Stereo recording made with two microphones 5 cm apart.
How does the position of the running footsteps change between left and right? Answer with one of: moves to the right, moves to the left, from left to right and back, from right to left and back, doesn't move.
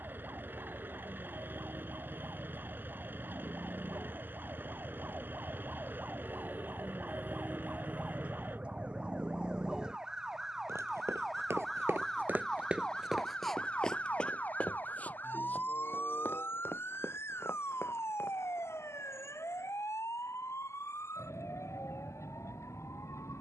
moves to the left.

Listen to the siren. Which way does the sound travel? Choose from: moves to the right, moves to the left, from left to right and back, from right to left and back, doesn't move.
moves to the left.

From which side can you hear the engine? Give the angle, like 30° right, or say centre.
40° right.